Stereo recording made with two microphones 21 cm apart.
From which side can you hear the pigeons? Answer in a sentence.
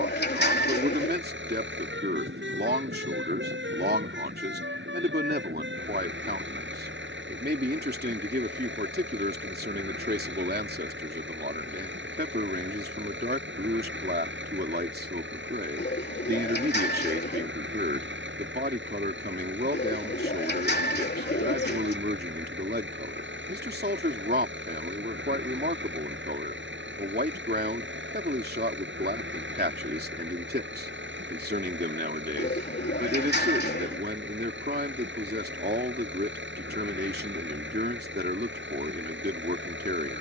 In this clip you hear the pigeons on the left.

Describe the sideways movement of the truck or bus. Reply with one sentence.
You can hear the truck or bus stay put.